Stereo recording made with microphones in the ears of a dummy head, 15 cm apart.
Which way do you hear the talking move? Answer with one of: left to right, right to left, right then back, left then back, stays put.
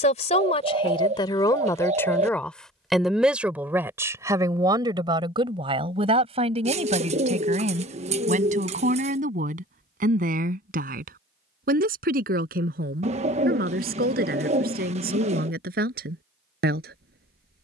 left to right.